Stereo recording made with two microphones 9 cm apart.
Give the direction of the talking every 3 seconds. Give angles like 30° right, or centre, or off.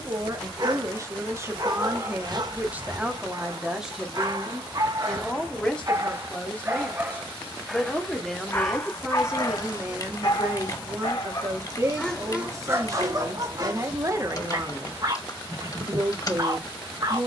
30° right, centre, 10° left, 20° right, 30° right, 30° right.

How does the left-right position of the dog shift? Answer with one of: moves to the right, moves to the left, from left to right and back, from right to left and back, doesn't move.
from right to left and back.